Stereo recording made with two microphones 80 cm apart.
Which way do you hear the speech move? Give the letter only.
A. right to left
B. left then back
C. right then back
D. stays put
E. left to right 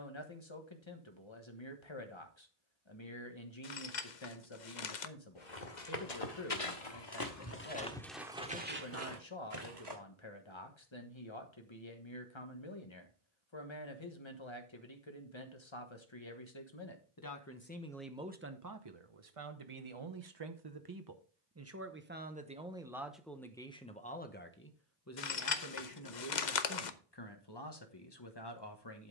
C.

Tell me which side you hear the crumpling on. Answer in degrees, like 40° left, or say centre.
60° left.